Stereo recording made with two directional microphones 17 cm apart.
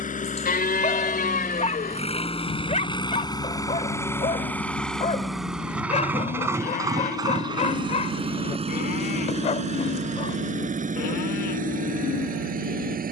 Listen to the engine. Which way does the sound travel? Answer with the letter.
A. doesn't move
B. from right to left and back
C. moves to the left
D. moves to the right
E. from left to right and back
D.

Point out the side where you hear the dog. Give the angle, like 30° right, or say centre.
40° left.